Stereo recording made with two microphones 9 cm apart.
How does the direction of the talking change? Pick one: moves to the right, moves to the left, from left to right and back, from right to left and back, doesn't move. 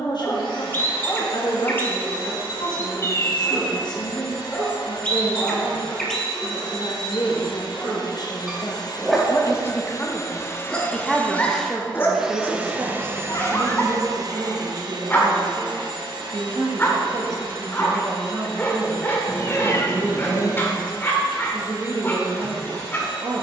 moves to the right.